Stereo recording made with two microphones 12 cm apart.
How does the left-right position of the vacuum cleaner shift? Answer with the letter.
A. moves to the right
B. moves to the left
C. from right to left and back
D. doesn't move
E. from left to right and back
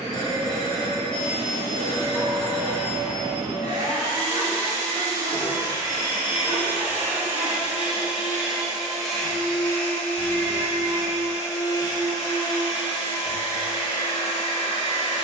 B.